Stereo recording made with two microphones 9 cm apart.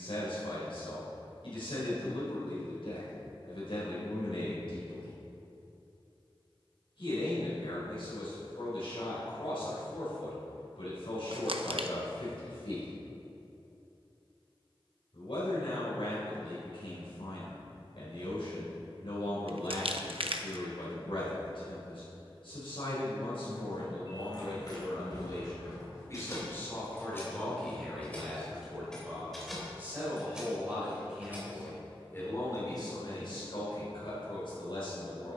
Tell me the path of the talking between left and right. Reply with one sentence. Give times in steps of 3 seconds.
In this clip you hear the talking on the left from 0 s, in the centre from 27 s and on the left from 33 s.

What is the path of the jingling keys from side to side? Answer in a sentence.
You can hear the jingling keys go from the left side to the right.